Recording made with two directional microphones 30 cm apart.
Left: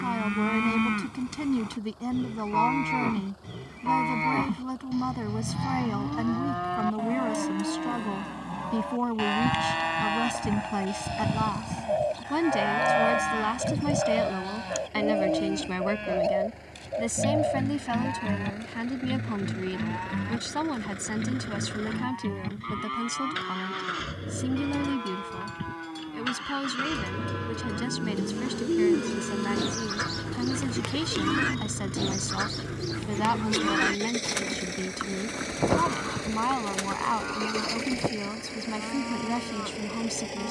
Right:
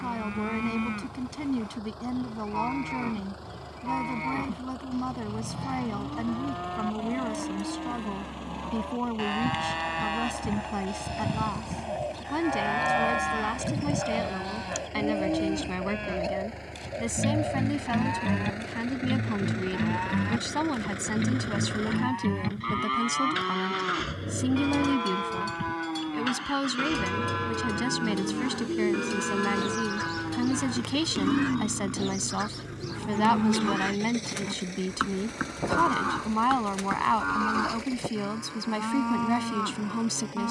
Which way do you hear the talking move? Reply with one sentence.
You can hear the talking go from the left side to the right.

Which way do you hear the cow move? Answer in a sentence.
You can hear the cow go from the left side to the right.